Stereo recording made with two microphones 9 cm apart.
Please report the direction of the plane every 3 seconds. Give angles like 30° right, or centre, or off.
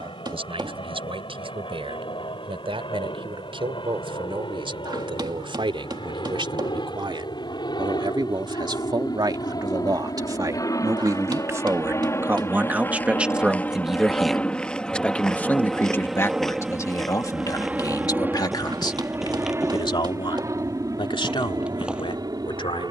70° left, 60° left, 50° left, 40° left, 20° left, 10° right, 30° right, 40° right.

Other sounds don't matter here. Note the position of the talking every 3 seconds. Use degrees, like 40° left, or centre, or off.
70° right, 60° right, 60° right, 40° right, 10° right, 30° left, 50° left, 60° left.